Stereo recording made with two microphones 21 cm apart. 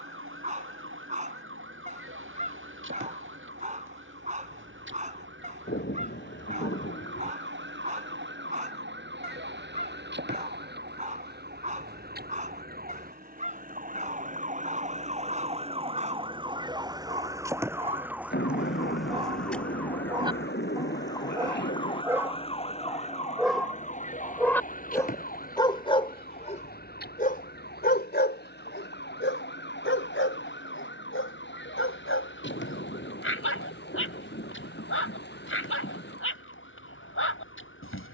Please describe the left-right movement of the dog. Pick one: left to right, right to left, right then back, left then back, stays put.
right to left.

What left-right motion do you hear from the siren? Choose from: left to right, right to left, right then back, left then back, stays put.
right to left.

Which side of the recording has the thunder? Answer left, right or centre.
left.